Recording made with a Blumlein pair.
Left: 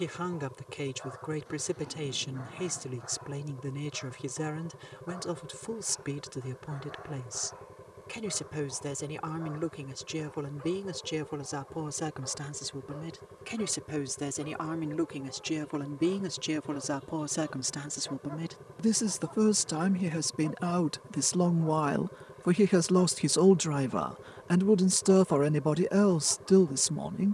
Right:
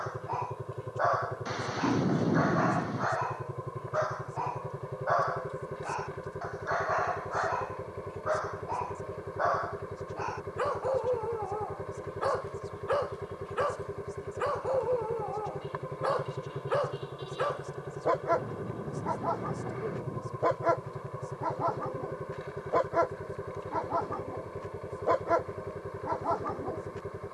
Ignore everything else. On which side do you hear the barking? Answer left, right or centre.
right.